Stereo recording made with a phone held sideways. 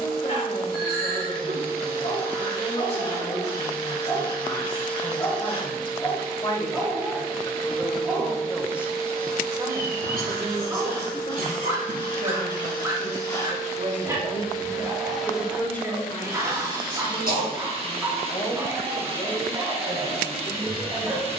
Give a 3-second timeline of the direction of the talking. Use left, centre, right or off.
left, left, centre, right, right, left, left.